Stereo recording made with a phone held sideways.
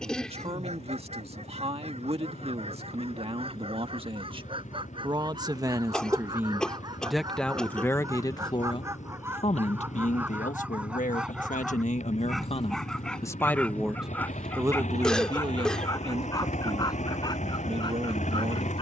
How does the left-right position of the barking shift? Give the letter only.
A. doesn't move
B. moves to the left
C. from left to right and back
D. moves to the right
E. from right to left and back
B.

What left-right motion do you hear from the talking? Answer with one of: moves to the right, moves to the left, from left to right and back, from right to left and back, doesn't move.
from right to left and back.